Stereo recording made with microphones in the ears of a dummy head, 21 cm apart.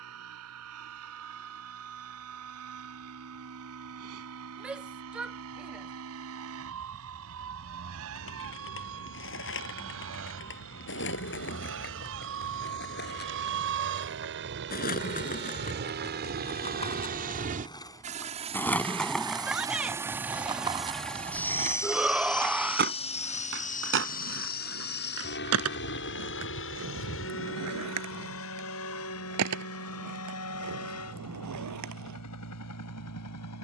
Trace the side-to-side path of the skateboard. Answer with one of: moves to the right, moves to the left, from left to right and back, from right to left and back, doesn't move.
moves to the right.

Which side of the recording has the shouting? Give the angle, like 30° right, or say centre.
centre.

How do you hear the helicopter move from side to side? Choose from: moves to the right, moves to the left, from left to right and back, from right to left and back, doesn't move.
moves to the left.